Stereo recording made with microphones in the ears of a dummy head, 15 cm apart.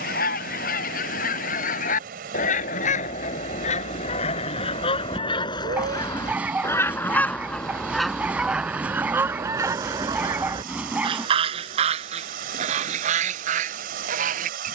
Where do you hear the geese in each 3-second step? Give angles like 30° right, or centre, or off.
60° left, 40° left, 10° left, 30° right, 50° right.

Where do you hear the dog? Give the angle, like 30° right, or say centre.
10° right.